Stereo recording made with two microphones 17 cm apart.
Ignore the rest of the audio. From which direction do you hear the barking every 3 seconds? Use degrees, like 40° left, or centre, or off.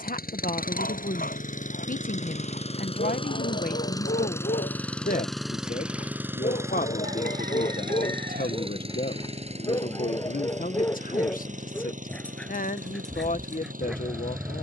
60° left, 50° left, 40° left, 20° left, centre.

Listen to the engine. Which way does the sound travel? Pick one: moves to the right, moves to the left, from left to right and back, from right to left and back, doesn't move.
moves to the right.